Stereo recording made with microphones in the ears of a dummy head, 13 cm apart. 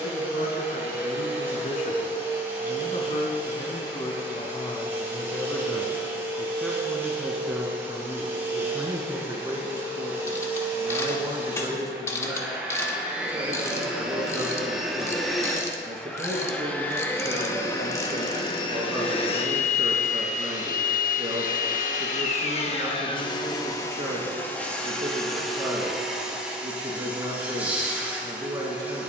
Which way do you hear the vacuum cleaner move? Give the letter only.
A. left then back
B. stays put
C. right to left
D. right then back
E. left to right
A.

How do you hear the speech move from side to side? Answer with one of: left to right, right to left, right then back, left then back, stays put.
left to right.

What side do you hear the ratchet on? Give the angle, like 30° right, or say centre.
20° left.